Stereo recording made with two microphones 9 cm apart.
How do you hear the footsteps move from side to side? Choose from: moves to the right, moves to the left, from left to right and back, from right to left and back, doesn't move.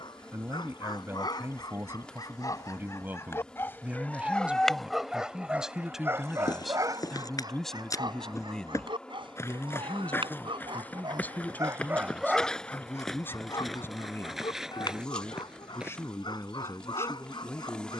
moves to the right.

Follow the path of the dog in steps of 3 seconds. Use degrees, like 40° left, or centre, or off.
50° left, 10° left, 40° right, 50° right, 30° left, 50° left.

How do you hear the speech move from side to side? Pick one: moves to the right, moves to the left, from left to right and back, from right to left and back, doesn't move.
moves to the left.